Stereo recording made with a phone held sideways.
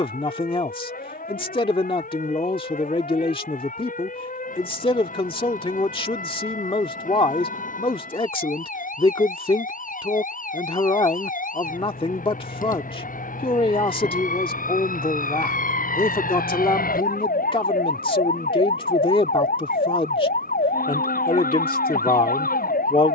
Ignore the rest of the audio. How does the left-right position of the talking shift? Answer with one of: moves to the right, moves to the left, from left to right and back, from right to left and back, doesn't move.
doesn't move.